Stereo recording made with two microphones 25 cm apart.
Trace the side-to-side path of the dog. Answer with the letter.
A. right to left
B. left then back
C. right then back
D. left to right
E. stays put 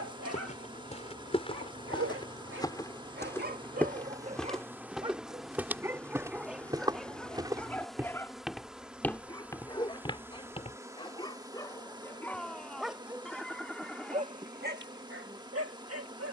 B.